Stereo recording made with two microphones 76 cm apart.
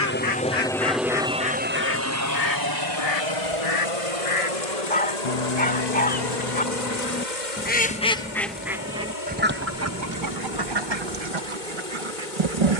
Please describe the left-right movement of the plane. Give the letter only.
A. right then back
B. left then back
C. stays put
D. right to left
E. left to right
E.